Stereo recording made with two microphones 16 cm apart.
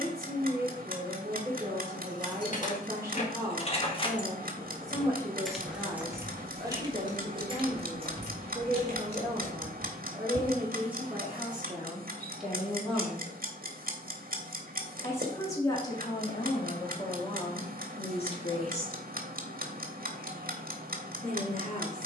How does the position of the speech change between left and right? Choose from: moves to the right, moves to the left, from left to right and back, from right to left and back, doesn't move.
moves to the left.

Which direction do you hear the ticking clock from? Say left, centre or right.
right.